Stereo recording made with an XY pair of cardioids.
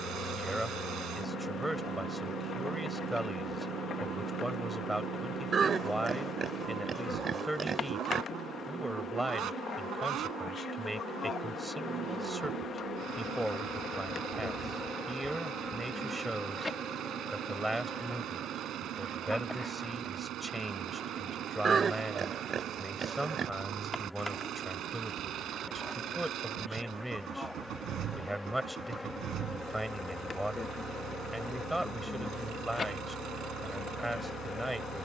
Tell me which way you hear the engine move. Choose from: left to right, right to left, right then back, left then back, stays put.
stays put.